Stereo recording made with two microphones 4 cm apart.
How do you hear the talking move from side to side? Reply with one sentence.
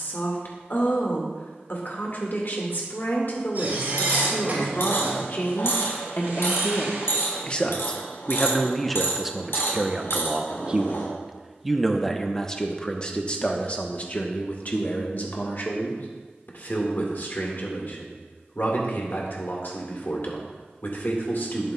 You can hear the talking move from left to right and back again.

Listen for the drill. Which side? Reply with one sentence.
In this clip you hear the drill on the right.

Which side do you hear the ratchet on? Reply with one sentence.
In this clip you hear the ratchet on the left.